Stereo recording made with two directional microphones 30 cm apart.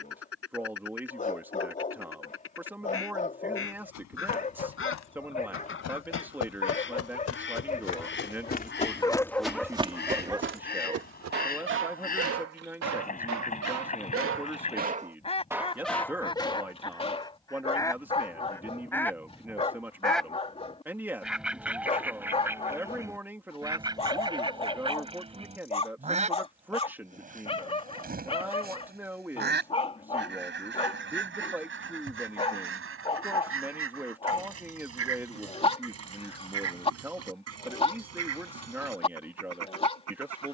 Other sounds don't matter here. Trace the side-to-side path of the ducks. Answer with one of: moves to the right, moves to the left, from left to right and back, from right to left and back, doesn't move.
moves to the right.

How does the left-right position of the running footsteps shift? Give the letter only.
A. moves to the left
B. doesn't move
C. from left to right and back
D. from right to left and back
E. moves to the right
E.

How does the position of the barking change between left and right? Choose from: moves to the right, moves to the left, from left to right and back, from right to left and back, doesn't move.
from left to right and back.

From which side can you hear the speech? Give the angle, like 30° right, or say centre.
10° right.